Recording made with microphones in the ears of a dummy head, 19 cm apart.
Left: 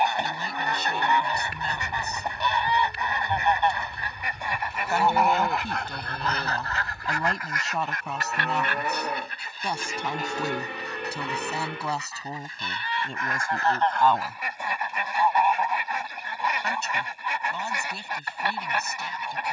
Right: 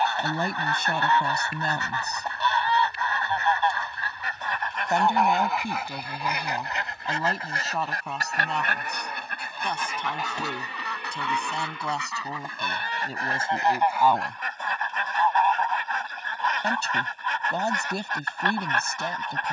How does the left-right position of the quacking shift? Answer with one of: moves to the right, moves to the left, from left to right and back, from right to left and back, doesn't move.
from left to right and back.